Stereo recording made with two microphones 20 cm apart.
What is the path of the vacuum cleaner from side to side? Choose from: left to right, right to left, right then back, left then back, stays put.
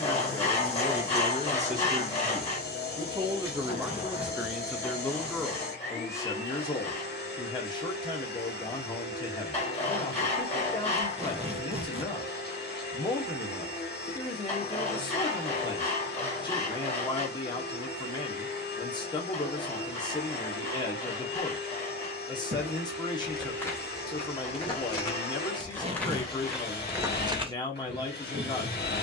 stays put.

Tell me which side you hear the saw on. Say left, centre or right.
left.